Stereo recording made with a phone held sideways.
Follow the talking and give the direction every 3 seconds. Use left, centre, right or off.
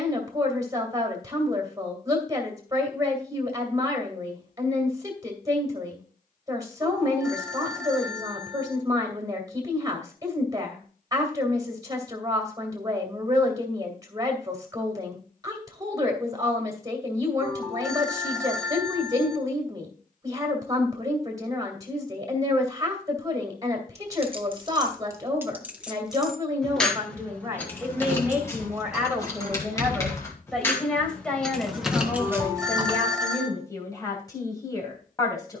right, right, right, right, right, right, right, right, right, centre, centre, left.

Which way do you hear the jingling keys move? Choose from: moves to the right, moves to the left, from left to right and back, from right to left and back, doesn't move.
from right to left and back.